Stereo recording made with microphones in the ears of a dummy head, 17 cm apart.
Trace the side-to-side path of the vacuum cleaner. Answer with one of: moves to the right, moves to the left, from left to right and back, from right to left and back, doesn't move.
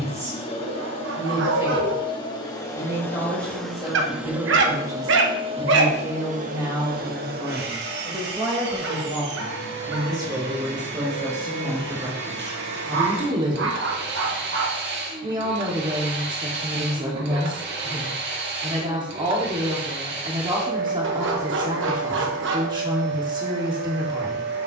moves to the right.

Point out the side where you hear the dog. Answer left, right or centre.
right.